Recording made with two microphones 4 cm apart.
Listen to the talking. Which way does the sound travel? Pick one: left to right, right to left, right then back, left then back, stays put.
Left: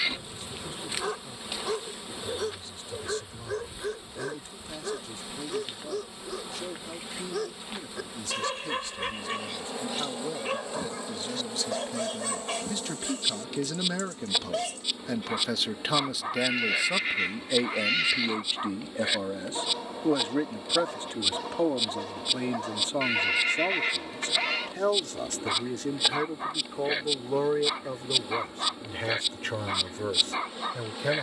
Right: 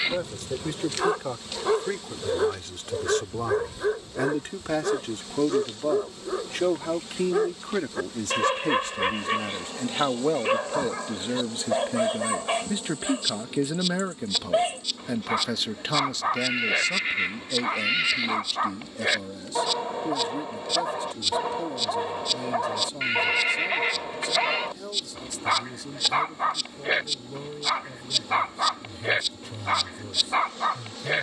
right to left.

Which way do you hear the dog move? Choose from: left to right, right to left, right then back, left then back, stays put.
stays put.